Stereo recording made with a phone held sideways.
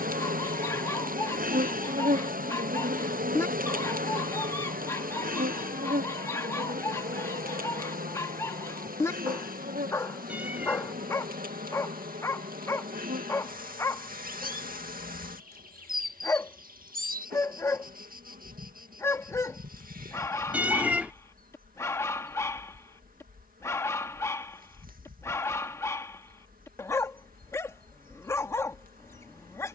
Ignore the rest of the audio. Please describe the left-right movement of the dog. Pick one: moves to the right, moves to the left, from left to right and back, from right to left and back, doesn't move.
doesn't move.